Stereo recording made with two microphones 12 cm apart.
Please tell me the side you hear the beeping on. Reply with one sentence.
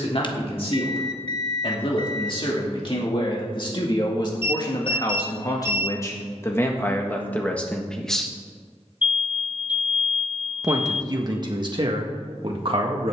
You can hear the beeping on the left.